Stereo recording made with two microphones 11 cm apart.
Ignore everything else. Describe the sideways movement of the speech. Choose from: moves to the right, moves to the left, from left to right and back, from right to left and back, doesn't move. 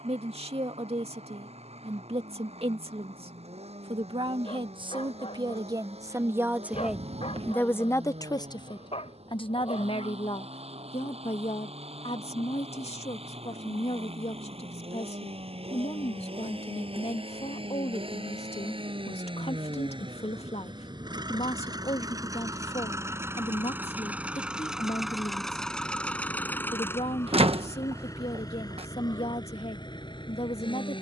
moves to the left.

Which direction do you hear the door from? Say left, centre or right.
right.